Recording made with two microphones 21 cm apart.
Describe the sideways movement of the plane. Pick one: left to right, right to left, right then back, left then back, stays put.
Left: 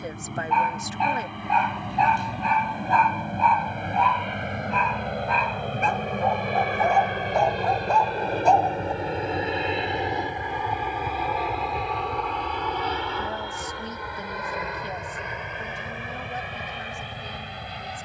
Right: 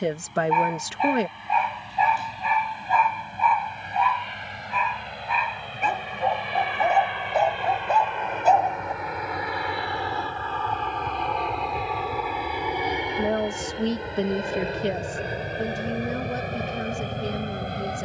left to right.